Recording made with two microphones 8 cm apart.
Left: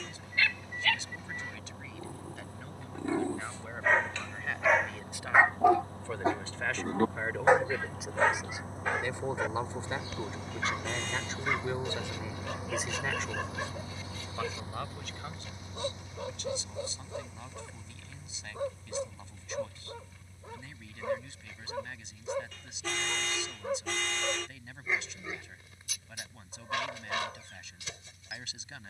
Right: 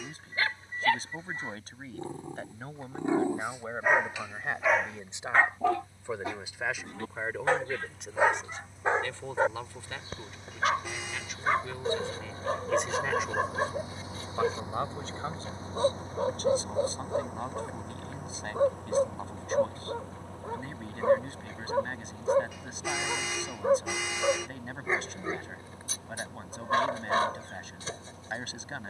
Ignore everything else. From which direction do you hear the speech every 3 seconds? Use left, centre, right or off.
right, right, centre, left, centre, right, right, right, right, right.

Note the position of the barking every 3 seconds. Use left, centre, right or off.
right, centre, centre, right, right, right, right, right, right, right.